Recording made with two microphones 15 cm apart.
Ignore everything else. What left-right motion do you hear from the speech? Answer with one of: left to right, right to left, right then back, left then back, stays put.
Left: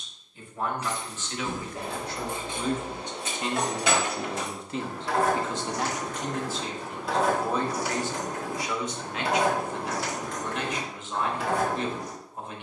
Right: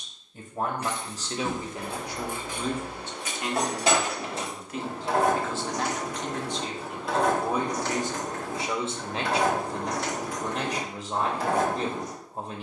left then back.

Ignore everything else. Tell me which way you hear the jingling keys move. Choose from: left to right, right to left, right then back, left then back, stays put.
left then back.